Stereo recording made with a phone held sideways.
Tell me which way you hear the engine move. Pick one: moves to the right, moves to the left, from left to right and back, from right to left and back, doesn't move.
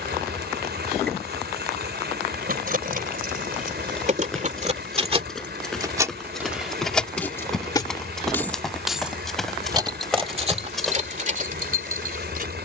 doesn't move.